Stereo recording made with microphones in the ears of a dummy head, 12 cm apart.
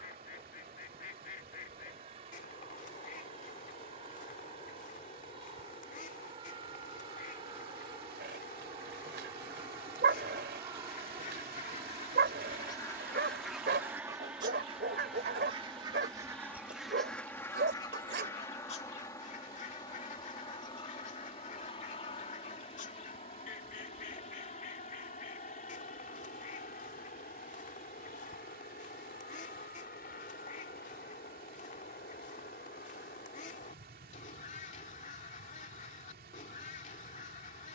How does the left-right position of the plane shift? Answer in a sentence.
You can hear the plane travel towards the left.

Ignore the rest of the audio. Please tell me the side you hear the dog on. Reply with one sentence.
You can hear the dog on the right.